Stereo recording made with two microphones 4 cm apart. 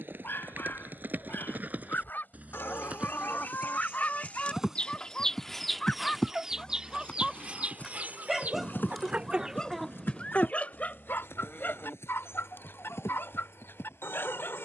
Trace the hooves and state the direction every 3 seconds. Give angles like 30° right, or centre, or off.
40° right, 10° right, 30° left, 60° left, 70° left.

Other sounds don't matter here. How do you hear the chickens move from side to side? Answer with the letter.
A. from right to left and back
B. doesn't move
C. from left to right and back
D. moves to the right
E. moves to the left
C.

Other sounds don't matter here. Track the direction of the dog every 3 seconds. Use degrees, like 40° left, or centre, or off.
50° left, 30° left, centre, 30° left, 50° left.